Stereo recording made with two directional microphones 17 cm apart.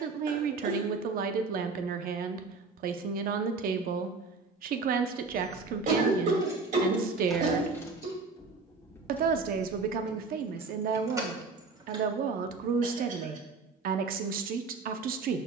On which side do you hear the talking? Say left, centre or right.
right.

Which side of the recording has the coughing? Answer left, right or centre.
right.